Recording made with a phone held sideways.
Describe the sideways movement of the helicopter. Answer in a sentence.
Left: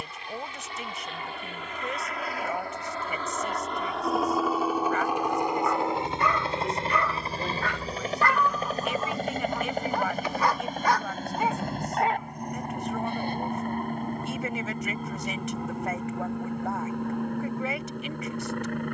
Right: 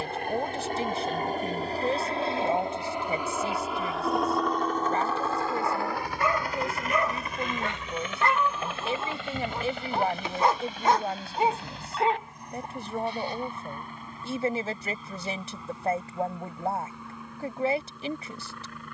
In this clip you hear the helicopter move from right to left.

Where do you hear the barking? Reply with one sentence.
You can hear the barking on the right.